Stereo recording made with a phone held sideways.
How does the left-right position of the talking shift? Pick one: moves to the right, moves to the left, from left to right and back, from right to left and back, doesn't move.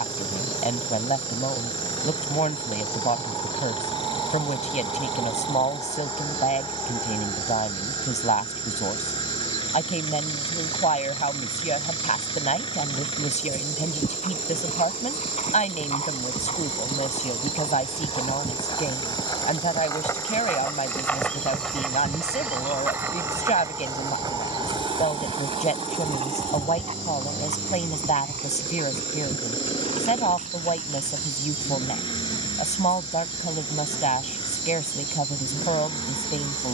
doesn't move.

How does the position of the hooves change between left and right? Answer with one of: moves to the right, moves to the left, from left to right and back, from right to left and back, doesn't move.
moves to the right.